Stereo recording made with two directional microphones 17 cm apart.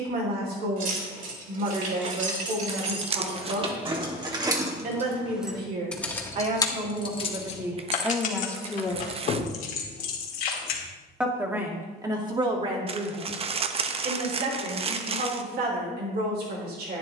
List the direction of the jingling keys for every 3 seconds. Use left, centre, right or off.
right, right, left, left, off, off.